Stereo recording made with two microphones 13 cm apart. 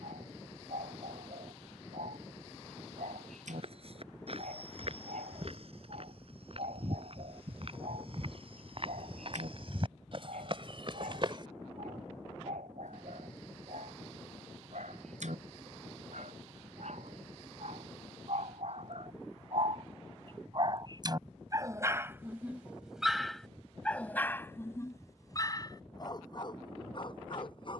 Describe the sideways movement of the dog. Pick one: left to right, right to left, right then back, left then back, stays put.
right to left.